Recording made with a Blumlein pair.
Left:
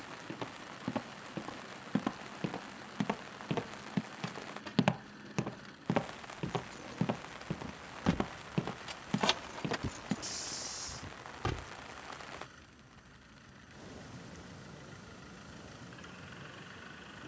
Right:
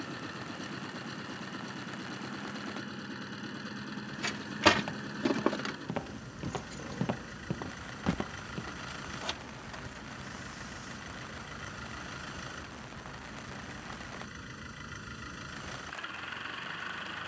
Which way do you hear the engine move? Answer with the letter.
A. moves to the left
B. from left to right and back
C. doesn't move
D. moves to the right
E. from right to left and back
C.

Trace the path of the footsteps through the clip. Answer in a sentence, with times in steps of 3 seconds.
You can hear the footsteps on the left from 0 s, in the centre from 6 s, on the left from 9 s and not at all from 12 s.